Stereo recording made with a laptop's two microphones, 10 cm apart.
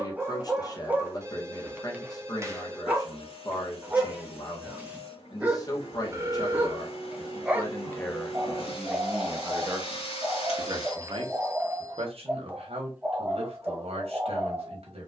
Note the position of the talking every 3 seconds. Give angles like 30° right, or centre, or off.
40° left, 40° left, 20° left, 40° right, 70° right.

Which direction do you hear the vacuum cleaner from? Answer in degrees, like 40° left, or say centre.
70° left.